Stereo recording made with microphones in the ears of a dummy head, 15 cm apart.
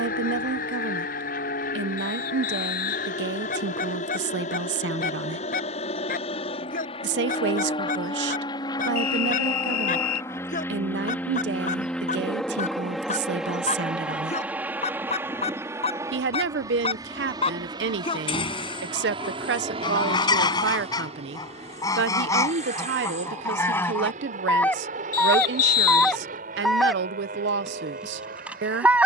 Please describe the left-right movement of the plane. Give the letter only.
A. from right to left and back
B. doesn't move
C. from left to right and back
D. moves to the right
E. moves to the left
D.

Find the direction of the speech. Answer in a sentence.
You can hear the speech on the right.